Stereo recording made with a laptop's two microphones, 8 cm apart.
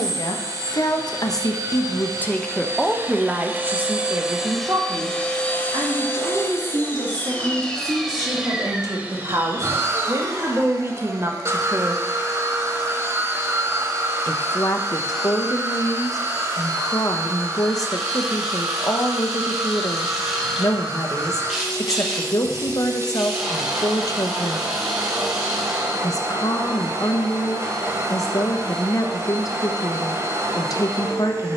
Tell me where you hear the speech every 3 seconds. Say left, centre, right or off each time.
left, right, right, right, left, left, left, left, left, left, left.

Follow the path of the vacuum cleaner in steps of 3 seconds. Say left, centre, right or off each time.
right, centre, centre, right, right, right, right, right, right, right, right.